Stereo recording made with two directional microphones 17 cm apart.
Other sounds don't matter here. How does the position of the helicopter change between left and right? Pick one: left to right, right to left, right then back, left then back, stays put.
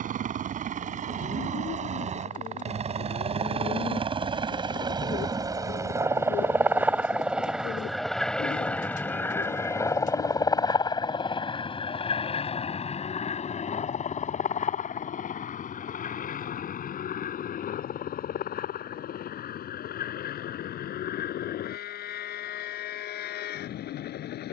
right to left.